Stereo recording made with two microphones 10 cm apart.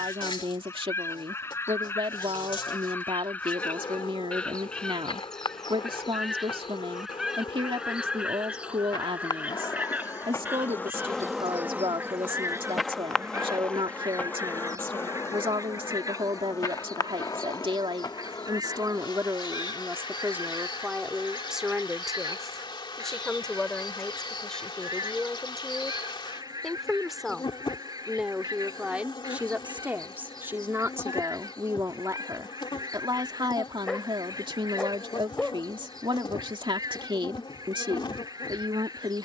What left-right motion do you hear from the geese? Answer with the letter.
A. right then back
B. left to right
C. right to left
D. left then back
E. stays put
B.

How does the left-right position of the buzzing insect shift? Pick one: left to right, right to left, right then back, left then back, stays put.
right then back.